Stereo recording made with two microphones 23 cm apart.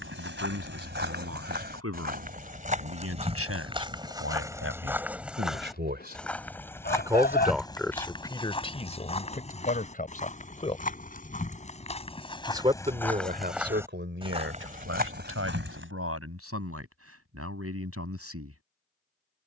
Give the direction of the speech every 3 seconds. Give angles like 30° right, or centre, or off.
80° right, 70° right, centre, 30° left, 40° right, 70° right, 80° right.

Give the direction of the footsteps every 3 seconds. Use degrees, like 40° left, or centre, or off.
40° right, 10° right, 20° left, 30° left, centre, 50° right, off.